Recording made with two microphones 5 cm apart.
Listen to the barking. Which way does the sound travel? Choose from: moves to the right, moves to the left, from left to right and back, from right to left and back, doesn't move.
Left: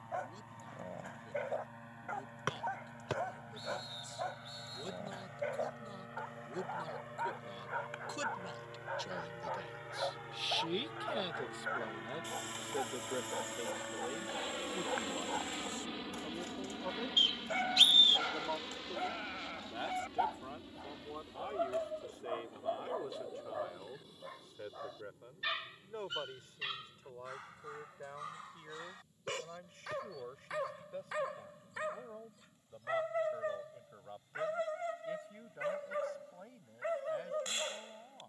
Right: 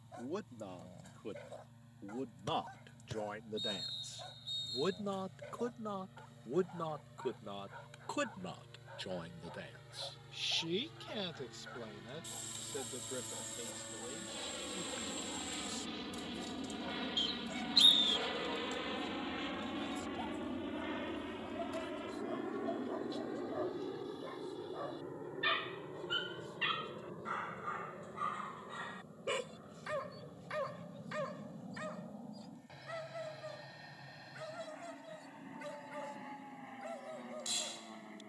from left to right and back.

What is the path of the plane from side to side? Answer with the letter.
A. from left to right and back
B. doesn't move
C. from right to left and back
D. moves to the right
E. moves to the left
D.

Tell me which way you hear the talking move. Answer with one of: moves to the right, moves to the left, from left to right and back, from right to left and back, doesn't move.
moves to the left.